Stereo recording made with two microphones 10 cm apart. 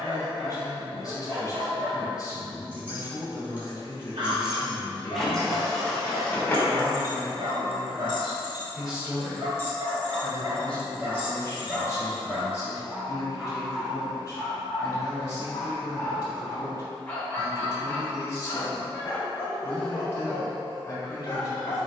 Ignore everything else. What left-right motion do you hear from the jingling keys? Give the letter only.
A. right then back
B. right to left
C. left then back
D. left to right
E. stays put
C.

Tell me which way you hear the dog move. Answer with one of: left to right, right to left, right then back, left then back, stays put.
right to left.